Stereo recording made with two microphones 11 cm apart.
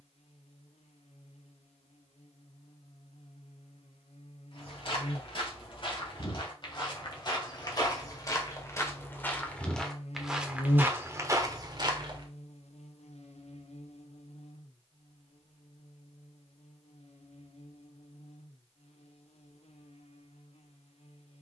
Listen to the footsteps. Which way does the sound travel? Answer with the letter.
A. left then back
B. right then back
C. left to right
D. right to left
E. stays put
C.